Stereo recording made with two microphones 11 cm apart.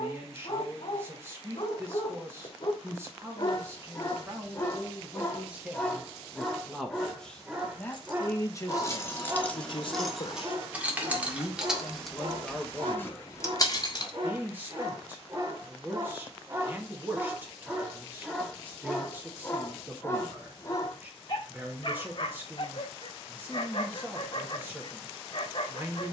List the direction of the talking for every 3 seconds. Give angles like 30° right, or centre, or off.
20° right, 20° right, 10° left, 40° left, 10° right, 20° right, 20° right, 20° right, 20° right.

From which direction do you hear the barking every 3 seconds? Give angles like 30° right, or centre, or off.
50° left, 20° left, 10° right, 30° right, 40° right, 20° right, 20° left, 40° left, 50° left.